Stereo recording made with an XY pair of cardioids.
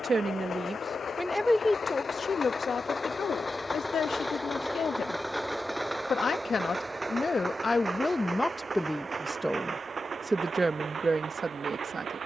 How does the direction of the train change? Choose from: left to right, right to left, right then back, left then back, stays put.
left to right.